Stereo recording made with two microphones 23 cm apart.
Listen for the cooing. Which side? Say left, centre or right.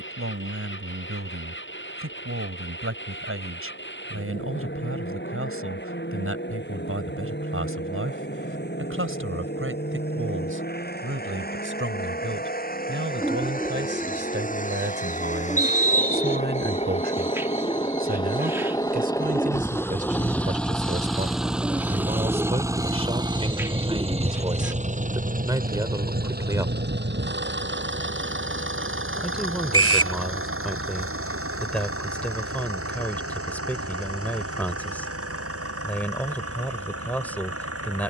centre.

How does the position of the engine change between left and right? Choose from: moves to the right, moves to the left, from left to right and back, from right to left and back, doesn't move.
moves to the right.